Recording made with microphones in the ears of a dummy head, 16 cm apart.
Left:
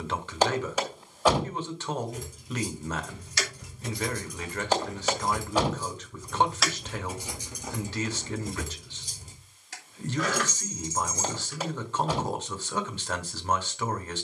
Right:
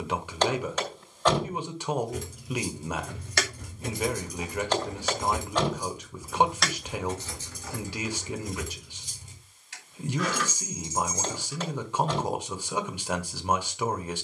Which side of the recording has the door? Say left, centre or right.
centre.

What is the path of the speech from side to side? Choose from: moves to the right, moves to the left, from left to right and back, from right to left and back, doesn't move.
doesn't move.